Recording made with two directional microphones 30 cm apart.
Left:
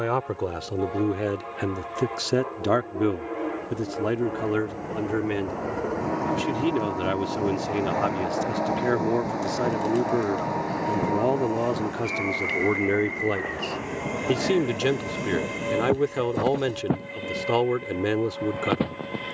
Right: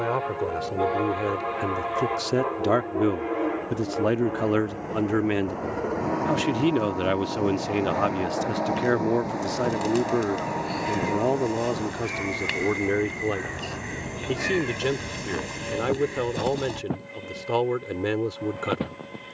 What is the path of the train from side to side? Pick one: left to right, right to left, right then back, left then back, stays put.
right to left.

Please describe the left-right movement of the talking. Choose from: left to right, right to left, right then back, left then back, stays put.
right then back.